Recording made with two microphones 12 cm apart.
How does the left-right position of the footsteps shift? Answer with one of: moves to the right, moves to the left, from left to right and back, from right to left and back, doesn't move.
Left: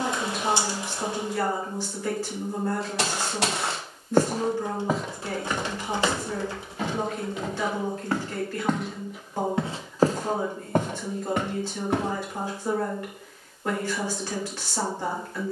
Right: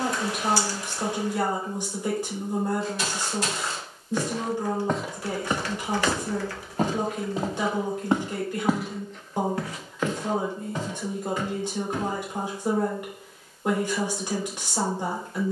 from left to right and back.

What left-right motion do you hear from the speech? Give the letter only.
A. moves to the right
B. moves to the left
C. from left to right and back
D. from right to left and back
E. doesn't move
E.